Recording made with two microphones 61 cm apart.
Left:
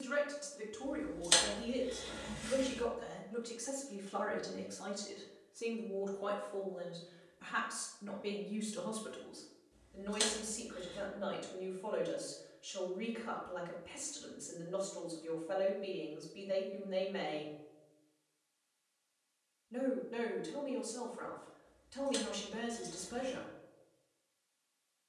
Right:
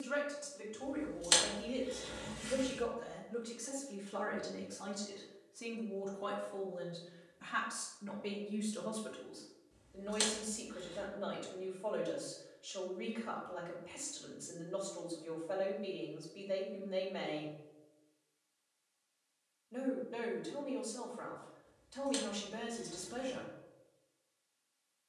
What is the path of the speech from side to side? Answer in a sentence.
You can hear the speech move from left to right and back again.